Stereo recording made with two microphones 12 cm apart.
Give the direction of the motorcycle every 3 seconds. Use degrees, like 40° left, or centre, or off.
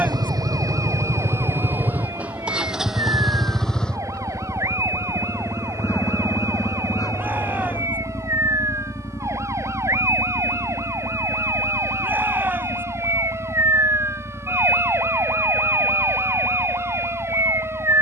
20° right, 10° left, 30° left, 40° left, 50° left, 50° left.